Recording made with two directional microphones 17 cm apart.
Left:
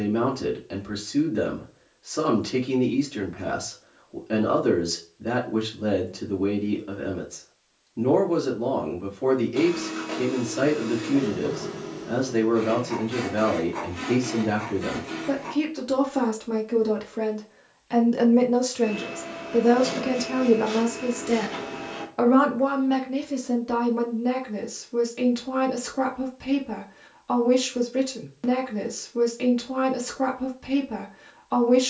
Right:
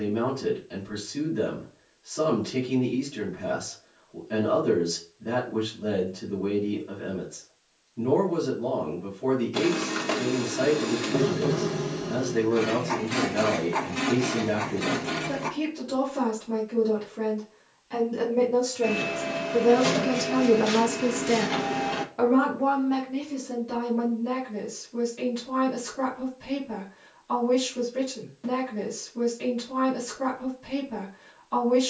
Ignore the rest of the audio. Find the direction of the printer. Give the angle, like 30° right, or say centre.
50° right.